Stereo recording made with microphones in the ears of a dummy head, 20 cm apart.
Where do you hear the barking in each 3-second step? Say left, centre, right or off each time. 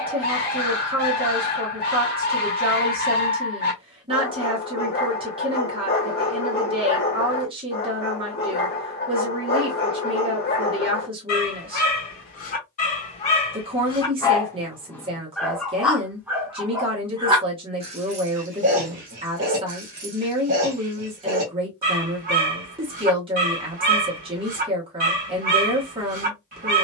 left, left, left, left, left, centre, right, right, right.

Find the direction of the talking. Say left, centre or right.
right.